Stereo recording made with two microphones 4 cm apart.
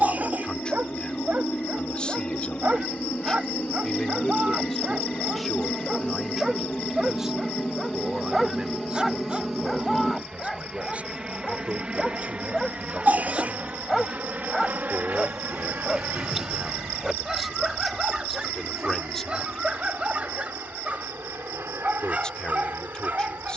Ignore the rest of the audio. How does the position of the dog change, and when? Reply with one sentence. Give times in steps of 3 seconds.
You can hear the dog on the right from 0 s, in the centre from 6 s and on the right from 18 s.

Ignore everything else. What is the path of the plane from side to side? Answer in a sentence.
In this clip you hear the plane move from left to right.